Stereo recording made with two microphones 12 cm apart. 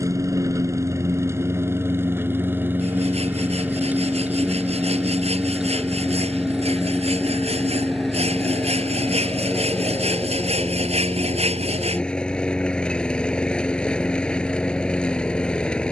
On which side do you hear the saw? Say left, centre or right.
right.